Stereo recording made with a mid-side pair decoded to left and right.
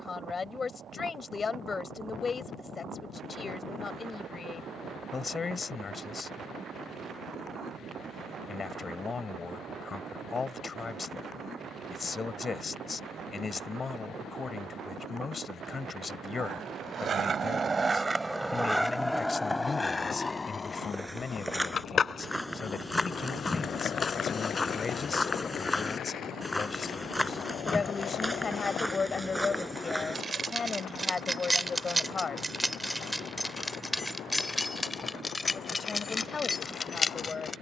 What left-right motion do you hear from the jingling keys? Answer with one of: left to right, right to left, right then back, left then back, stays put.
right to left.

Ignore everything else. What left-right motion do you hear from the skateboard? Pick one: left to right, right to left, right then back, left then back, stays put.
right to left.